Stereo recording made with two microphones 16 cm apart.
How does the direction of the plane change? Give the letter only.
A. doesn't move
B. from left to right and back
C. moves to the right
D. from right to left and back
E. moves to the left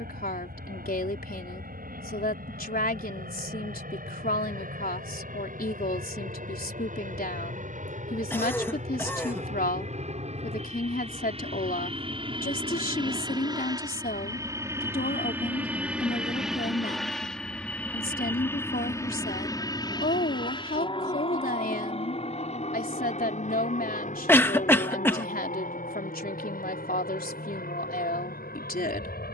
E.